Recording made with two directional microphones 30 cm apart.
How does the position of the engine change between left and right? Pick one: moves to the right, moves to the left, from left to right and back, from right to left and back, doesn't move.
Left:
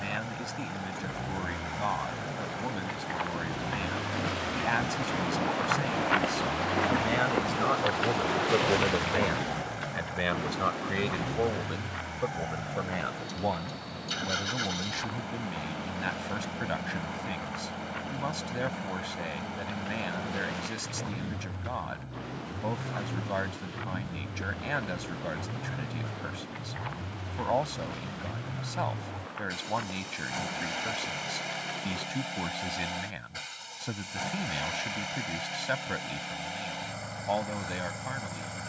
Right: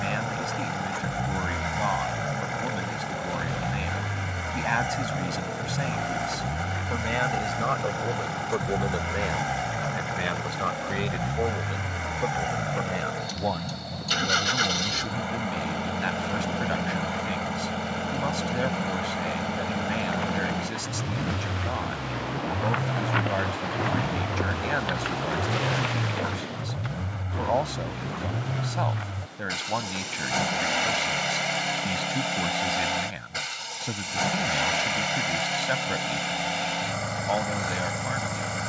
doesn't move.